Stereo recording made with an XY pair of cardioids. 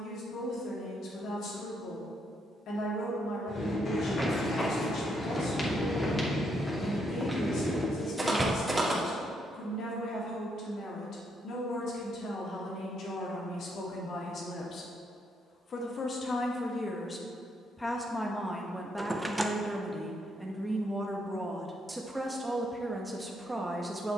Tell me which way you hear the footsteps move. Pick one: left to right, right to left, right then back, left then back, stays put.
left to right.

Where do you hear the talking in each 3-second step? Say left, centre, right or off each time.
left, left, left, left, left, left, centre, centre.